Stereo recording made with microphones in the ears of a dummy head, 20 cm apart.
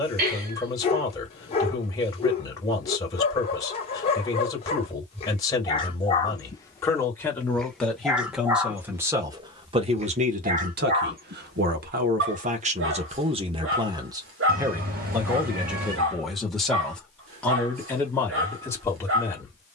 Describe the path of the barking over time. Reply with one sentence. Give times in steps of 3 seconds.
In this clip you hear the barking on the left from 0 s, in the centre from 6 s and on the right from 9 s.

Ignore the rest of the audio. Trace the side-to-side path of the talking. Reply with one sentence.
You can hear the talking move from left to right and back again.